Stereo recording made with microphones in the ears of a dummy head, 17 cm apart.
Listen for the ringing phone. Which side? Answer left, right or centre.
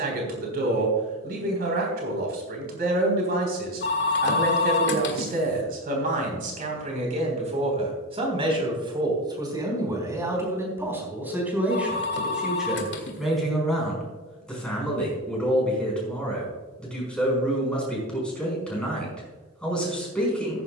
left.